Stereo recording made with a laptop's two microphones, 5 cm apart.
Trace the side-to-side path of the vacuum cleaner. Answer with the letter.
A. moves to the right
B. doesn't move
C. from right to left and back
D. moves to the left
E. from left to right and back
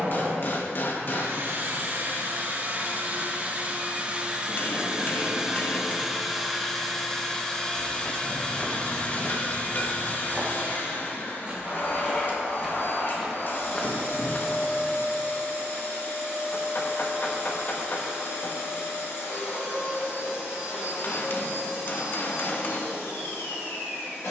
D.